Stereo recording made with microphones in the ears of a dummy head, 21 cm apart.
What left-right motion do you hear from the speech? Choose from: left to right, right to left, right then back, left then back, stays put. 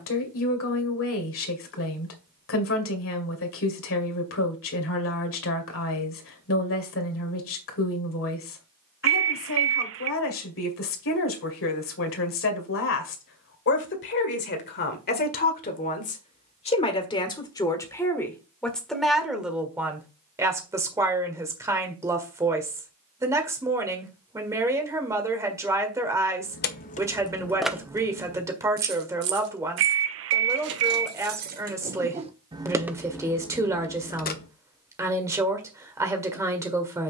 left to right.